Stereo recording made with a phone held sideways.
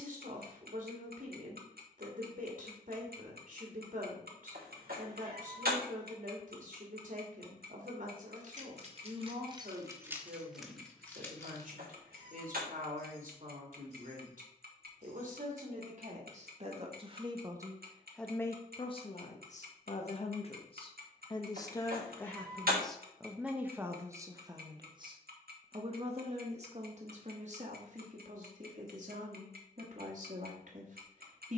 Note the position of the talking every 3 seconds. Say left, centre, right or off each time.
right, right, right, right, right, right, left, centre, right, right, right.